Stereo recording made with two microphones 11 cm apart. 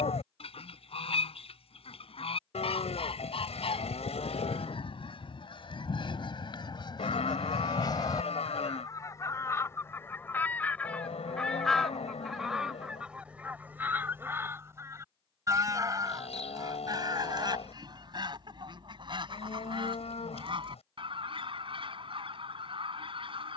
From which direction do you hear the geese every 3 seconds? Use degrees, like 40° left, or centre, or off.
70° left, 60° left, 40° left, 20° left, 10° right, 40° right, 50° right, 60° right.